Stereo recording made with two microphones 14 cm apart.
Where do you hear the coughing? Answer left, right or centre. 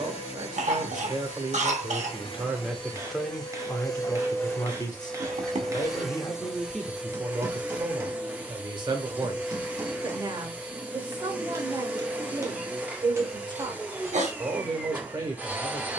right.